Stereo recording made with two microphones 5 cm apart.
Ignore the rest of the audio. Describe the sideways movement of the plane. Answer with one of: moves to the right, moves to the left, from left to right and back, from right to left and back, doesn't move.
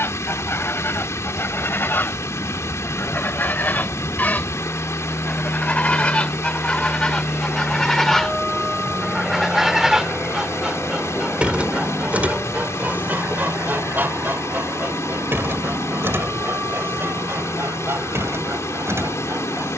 moves to the right.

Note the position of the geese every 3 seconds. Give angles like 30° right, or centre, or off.
50° left, 30° left, 10° left, 20° right, 40° right, 60° right, 60° right.